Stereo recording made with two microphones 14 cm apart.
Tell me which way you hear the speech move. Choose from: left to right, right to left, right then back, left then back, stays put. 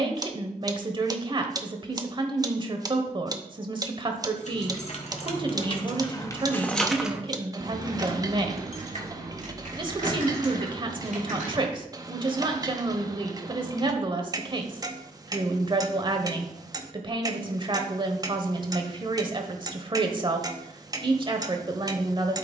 stays put.